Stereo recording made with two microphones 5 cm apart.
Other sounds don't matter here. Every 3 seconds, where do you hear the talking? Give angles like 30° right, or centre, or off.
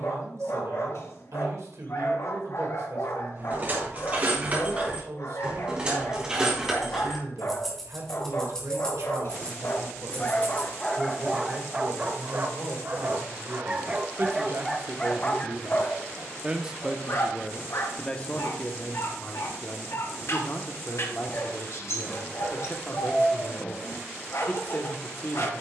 70° right, 70° right, 70° right, 70° right, 60° right, 20° right, 40° left, 40° left, 40° left.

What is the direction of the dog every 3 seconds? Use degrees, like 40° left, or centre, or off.
60° left, 60° left, 60° left, 20° left, 20° right, 50° left, 60° left, 60° left, 60° left.